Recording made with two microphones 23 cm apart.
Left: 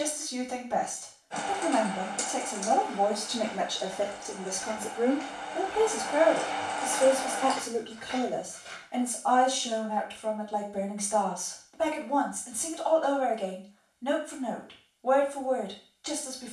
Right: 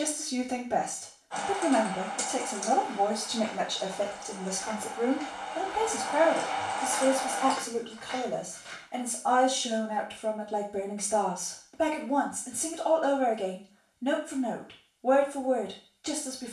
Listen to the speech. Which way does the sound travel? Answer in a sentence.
You can hear the speech move from right to left and back again.